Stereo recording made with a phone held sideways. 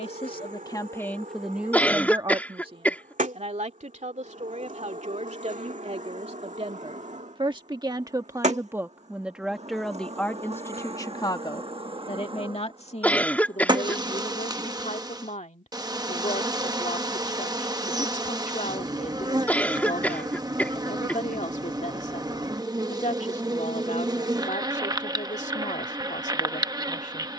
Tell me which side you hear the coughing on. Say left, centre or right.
centre.